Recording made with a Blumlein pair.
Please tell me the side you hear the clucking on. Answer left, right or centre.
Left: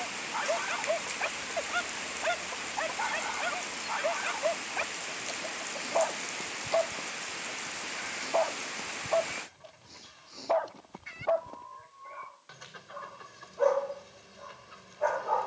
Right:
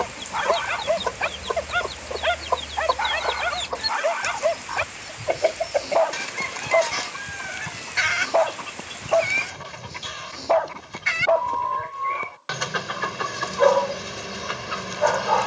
right.